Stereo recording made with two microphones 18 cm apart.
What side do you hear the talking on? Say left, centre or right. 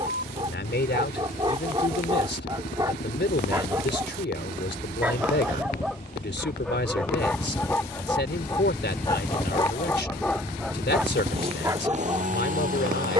left.